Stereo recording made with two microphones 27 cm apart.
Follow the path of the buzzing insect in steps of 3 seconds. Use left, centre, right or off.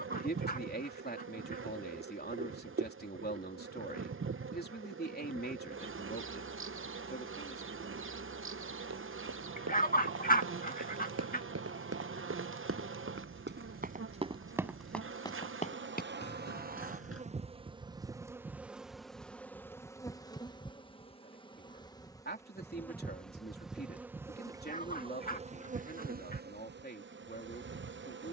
right, right, right, right, right, right, centre, centre, right, right.